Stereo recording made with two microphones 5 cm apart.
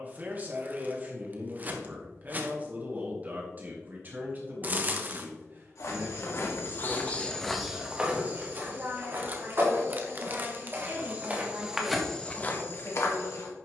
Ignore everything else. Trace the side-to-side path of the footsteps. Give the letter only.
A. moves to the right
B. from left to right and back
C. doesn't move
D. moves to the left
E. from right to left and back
B.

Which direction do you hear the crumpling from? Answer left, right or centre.
right.